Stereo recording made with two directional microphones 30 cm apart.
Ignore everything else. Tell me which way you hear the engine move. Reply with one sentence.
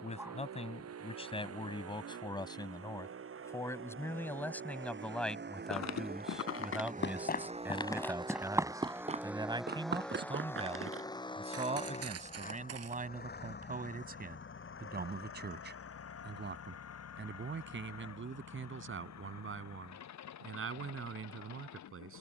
You can hear the engine travel towards the left.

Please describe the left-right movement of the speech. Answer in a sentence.
You can hear the speech move to the right.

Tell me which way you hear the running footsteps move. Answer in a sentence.
In this clip you hear the running footsteps move from left to right.